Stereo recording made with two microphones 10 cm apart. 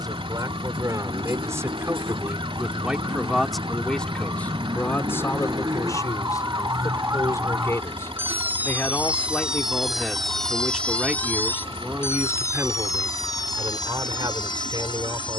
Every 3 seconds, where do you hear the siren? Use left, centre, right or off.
right, right, right, centre, left.